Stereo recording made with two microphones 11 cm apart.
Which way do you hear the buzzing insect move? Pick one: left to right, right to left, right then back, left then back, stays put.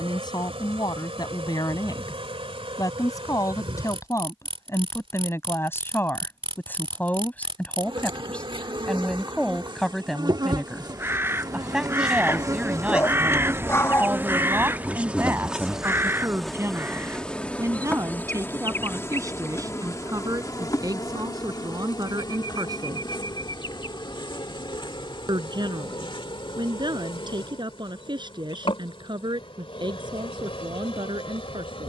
right to left.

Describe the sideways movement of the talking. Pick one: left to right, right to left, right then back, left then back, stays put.
left to right.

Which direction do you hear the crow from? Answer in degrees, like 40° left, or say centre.
20° right.